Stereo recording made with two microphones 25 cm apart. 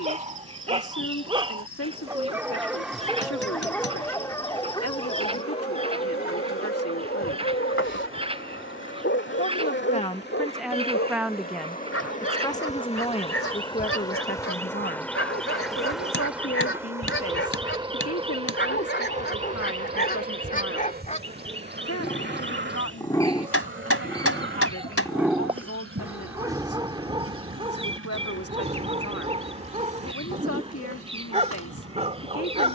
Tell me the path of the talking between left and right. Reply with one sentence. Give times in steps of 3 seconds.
You can hear the talking on the left from 0 s, in the centre from 9 s and on the left from 12 s.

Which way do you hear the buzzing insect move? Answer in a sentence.
You can hear the buzzing insect move from left to right.